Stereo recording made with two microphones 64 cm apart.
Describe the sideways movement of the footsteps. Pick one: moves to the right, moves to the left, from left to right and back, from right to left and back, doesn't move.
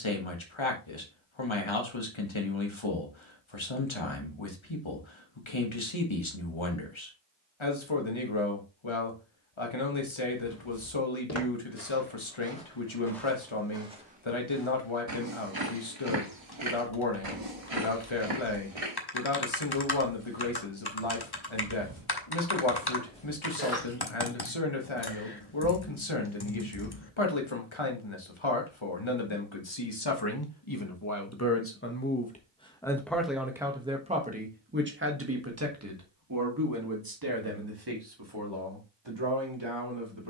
from left to right and back.